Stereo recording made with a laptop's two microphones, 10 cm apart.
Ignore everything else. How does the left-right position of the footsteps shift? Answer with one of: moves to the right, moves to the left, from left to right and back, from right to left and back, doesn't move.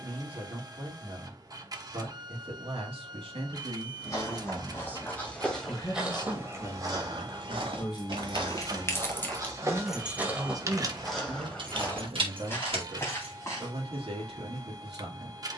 from left to right and back.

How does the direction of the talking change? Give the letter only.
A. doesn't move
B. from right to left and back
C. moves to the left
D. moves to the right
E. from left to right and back
B.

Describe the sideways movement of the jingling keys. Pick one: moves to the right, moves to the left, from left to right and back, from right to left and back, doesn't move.
moves to the right.